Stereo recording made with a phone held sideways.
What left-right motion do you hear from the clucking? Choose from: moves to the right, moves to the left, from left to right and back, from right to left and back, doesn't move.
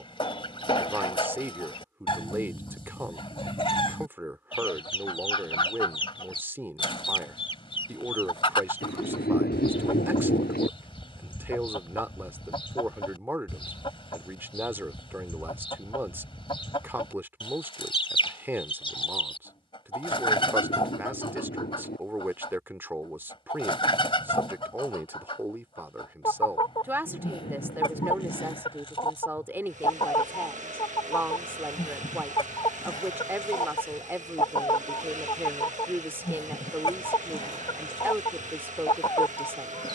doesn't move.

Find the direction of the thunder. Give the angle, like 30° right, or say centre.
80° left.